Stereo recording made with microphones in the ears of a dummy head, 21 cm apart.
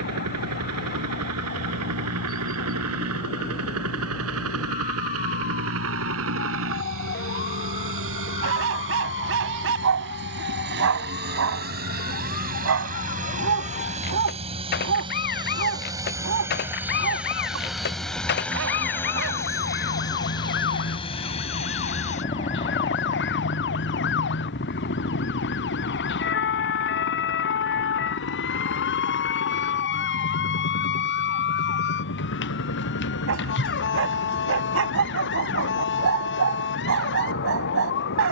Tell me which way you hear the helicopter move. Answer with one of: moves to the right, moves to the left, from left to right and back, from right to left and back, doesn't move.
moves to the left.